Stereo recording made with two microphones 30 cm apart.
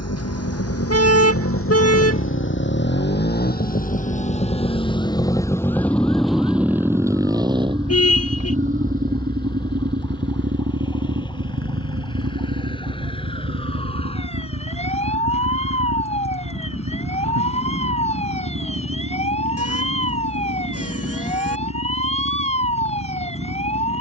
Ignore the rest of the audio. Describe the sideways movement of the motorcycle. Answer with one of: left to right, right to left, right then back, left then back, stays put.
left to right.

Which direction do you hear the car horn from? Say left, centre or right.
left.